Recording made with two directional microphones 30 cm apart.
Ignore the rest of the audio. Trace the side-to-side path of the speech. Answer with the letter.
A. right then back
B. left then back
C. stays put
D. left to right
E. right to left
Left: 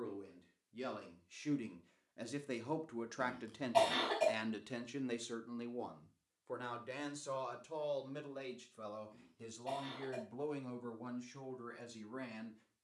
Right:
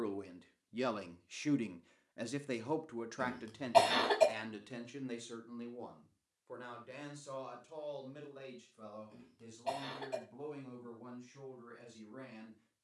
E.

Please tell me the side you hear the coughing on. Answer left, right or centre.
right.